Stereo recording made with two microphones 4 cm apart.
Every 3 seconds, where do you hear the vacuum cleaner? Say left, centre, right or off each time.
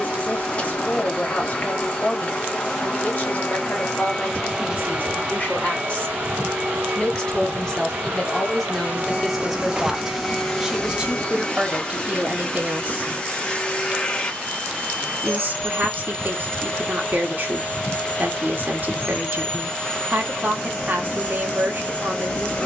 left, centre, right, centre, left, left, left, left.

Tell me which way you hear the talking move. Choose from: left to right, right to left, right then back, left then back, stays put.
left to right.